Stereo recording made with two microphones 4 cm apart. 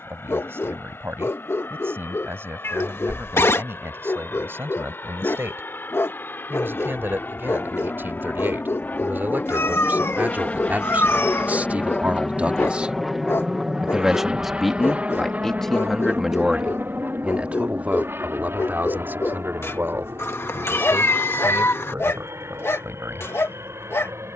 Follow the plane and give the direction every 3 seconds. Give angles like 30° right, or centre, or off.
70° left, 60° left, 50° left, 30° left, 10° right, 40° right, 60° right, 70° right.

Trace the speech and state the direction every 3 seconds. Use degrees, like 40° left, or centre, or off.
70° right, 70° right, 60° right, 50° right, 20° right, 10° right, 50° right, 70° right.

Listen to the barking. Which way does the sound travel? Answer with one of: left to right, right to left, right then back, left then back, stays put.
stays put.